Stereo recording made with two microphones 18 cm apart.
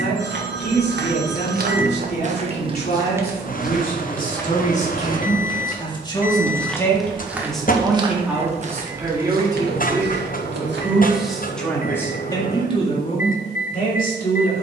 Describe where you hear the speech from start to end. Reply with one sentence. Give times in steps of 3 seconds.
You can hear the speech on the left from 0 s, in the centre from 6 s and on the left from 12 s.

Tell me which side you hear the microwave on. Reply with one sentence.
In this clip you hear the microwave on the left.